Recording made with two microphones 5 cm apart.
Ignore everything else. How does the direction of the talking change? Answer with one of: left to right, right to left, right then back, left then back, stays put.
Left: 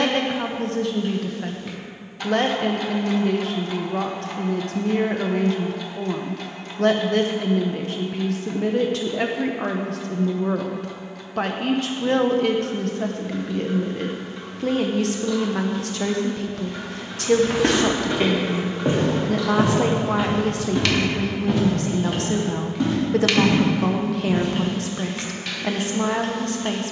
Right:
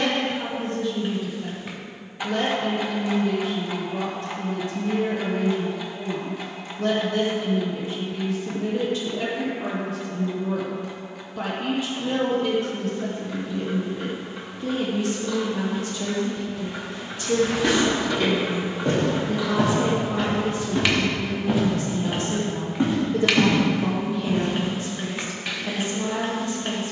stays put.